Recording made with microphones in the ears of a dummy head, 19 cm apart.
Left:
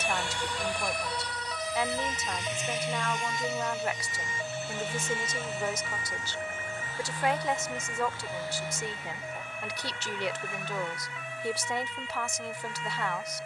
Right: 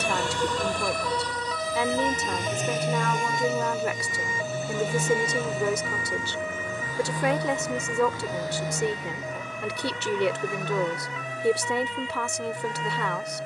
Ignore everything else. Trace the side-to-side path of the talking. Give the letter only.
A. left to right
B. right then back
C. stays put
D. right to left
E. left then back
C.